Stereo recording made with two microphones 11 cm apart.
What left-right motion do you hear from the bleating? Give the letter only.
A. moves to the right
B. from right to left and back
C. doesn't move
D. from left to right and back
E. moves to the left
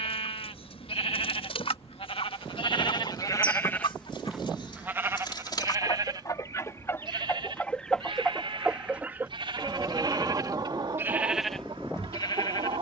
D.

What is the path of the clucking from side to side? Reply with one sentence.
In this clip you hear the clucking move from left to right.